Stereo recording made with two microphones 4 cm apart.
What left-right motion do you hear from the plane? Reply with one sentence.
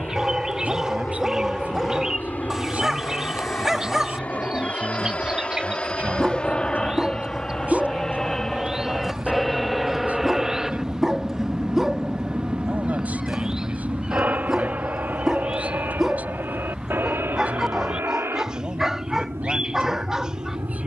In this clip you hear the plane go from the left side to the right.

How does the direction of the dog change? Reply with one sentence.
You can hear the dog stay put.